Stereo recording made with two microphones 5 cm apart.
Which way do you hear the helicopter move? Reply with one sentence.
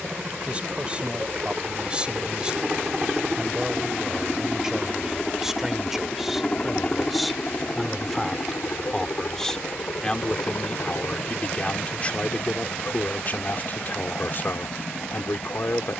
You can hear the helicopter travel towards the left.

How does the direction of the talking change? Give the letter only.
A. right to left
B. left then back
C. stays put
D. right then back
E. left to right
A.